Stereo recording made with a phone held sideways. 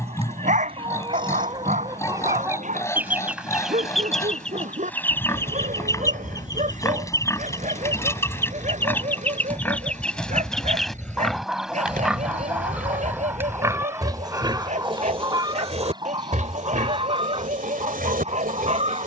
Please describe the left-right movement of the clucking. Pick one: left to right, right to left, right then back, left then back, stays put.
left then back.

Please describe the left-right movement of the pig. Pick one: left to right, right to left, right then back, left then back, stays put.
left to right.